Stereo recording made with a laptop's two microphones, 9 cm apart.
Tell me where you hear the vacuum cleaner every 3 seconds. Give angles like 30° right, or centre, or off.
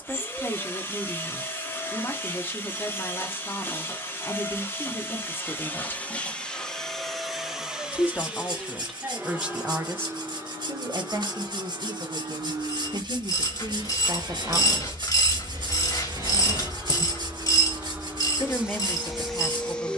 30° left, 30° left, centre, 30° right, 50° right, 40° right, centre.